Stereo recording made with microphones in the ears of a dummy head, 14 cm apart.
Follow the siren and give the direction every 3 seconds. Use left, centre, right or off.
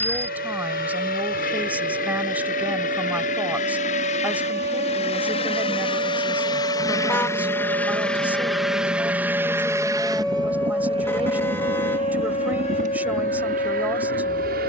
right, right, right, centre, left.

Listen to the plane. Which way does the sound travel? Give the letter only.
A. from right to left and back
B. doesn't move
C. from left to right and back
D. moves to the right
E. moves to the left
D.